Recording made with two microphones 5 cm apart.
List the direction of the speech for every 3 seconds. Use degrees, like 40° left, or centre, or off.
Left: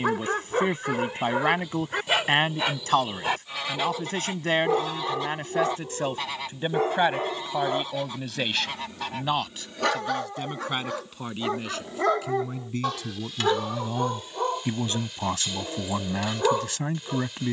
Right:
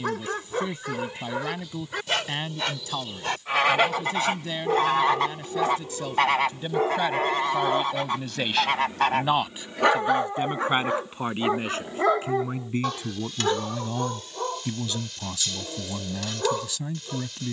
50° left, 50° left, 20° left, 30° right, 10° right, 50° left.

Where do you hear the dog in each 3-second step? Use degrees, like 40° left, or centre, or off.
20° left, 10° left, 10° right, 20° right, 10° left, 20° left.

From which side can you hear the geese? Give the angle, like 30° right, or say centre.
70° right.